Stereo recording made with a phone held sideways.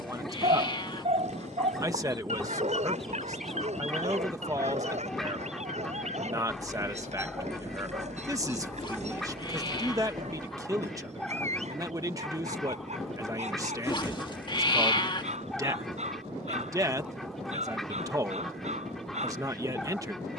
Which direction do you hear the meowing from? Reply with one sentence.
In this clip you hear the meowing on the left.